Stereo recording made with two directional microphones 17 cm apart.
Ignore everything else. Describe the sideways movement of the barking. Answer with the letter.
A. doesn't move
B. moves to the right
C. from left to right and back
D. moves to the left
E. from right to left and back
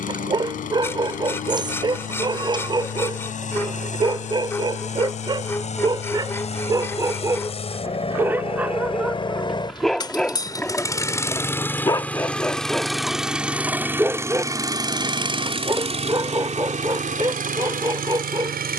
E.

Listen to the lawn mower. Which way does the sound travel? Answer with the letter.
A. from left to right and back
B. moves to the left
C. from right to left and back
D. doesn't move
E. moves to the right
E.